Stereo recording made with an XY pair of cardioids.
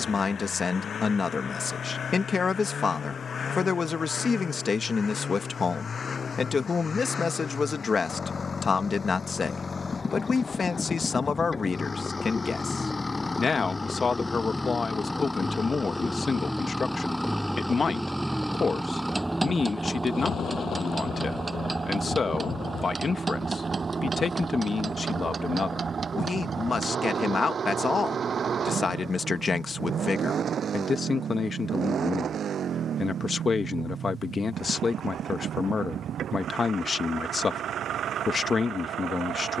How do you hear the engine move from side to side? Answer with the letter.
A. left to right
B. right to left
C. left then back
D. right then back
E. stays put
A.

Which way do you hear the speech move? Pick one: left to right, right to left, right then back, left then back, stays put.
stays put.